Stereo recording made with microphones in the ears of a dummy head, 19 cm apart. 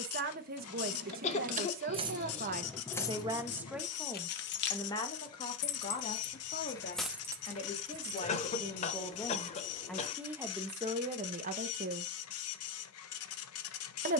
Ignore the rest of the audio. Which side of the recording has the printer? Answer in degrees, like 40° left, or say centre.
70° left.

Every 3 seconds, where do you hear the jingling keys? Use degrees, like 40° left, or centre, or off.
30° right, 40° left, centre, off, off.